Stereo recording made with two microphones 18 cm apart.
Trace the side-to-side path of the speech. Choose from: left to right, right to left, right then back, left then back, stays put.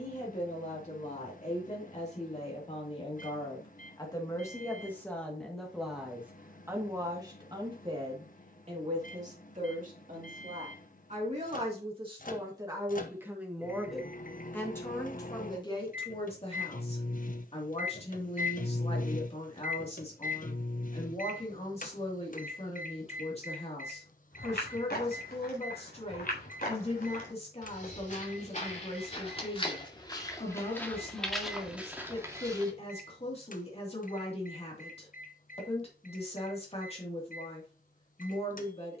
right then back.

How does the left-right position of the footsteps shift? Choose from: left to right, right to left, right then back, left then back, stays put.
left to right.